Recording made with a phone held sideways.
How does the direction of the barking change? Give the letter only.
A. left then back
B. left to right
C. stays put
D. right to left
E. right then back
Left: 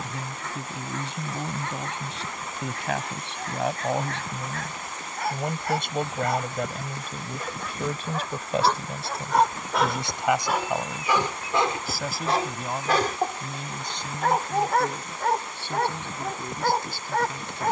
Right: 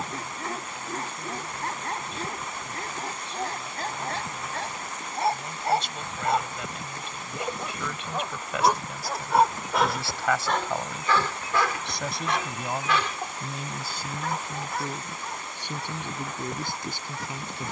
D.